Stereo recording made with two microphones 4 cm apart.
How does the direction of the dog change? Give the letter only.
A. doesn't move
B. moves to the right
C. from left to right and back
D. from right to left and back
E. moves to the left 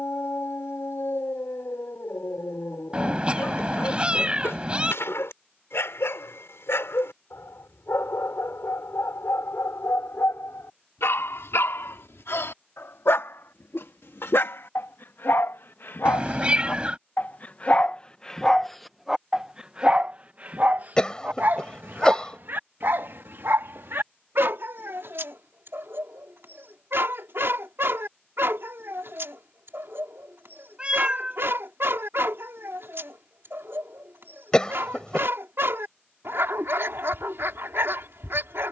B.